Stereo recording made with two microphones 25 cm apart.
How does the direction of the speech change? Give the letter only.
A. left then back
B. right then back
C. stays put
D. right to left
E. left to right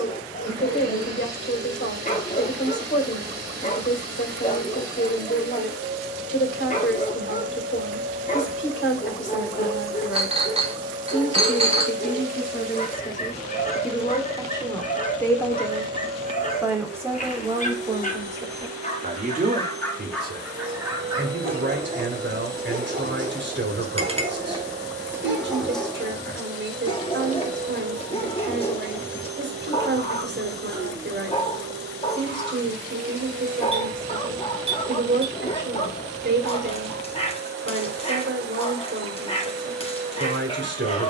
E.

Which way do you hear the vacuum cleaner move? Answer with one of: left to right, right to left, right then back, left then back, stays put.
stays put.